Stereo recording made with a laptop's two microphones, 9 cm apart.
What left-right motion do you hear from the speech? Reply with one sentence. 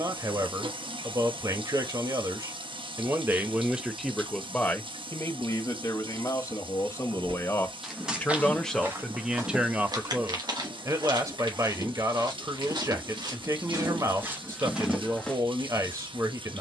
You can hear the speech move from right to left and back again.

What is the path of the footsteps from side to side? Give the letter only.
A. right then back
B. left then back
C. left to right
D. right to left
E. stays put
A.